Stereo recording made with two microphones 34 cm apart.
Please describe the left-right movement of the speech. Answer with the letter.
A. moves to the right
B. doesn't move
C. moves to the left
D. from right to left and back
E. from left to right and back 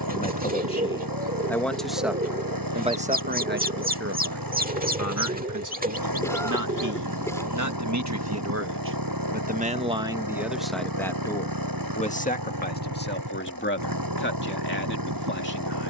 E.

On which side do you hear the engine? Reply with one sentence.
In this clip you hear the engine on the right.